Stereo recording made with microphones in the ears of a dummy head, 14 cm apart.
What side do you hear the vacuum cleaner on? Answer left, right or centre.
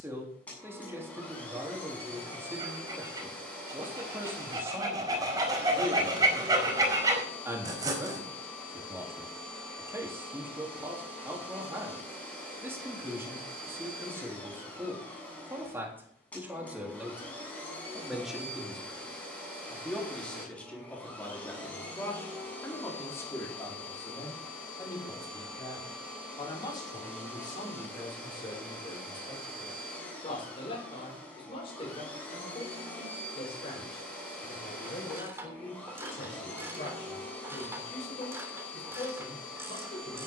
centre.